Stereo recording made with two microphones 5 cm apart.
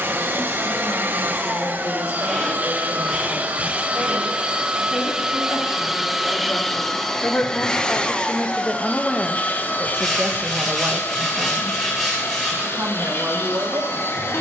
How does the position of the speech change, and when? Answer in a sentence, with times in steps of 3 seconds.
In this clip you hear the speech on the left from 0 s and on the right from 9 s.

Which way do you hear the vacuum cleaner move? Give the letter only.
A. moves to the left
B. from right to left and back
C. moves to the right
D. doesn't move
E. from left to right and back
A.